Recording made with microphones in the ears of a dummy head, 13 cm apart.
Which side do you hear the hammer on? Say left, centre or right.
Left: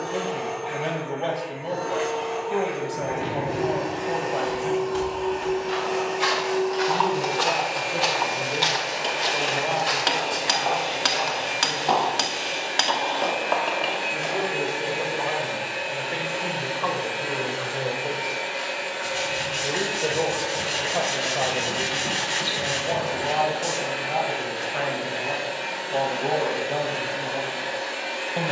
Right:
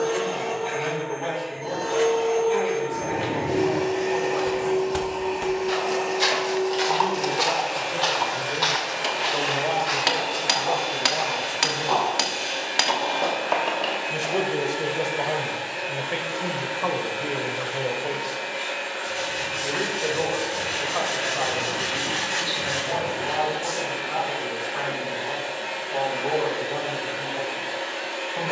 centre.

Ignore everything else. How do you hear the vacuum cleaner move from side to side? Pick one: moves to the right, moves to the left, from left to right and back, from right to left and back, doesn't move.
moves to the left.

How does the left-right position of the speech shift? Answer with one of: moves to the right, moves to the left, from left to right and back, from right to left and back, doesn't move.
from left to right and back.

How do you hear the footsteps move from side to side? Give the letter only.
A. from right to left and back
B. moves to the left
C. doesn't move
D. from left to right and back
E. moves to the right
B.